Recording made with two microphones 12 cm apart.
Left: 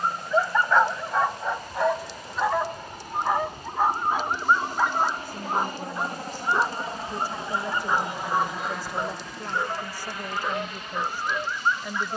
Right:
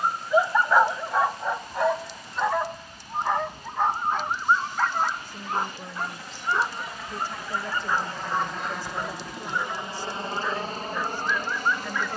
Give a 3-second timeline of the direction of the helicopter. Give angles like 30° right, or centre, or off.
70° left, 50° left, 20° left, 30° right.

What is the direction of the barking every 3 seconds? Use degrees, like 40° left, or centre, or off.
centre, 10° left, 20° left, 20° left.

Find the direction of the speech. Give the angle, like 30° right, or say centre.
10° left.